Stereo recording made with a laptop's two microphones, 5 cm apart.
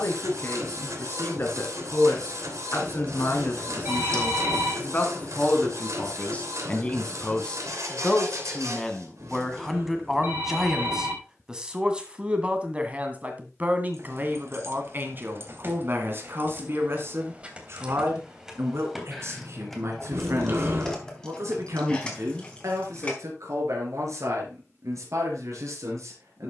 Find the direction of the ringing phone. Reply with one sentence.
In this clip you hear the ringing phone on the right.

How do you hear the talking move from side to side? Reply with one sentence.
You can hear the talking travel towards the right.